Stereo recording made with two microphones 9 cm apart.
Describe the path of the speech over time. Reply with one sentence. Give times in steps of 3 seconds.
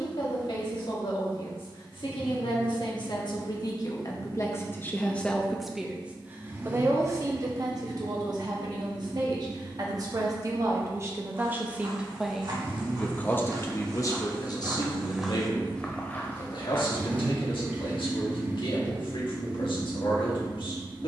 You can hear the speech on the left from 0 s, on the right from 6 s and on the left from 12 s.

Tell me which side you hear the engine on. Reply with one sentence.
In this clip you hear the engine on the right.